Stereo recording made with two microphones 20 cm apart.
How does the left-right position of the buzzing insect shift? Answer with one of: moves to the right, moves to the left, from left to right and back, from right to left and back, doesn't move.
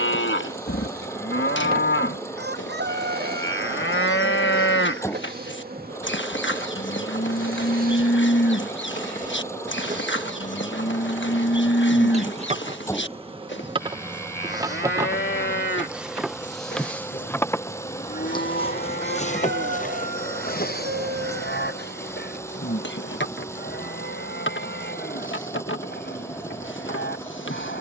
moves to the left.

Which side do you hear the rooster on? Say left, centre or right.
right.